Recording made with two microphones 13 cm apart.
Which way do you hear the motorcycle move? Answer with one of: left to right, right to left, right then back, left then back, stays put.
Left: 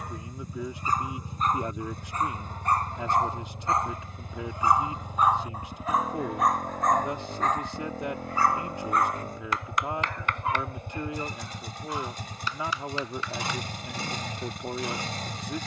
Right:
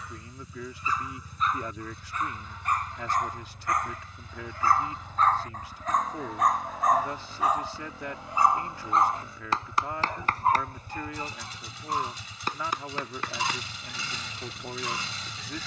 stays put.